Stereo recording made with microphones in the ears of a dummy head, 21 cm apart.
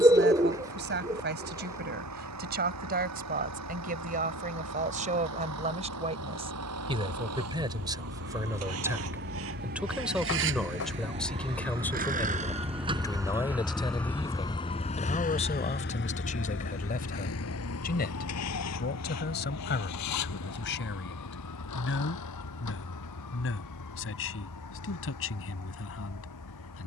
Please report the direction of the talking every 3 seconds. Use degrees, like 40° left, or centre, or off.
40° right, 30° right, 20° right, centre, 20° left, 30° left, 50° left, 50° left, 60° left.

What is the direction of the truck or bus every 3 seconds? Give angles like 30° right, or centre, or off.
70° right, 70° right, 70° right, 50° right, 10° right, 50° left, 70° left, 80° left, 80° left.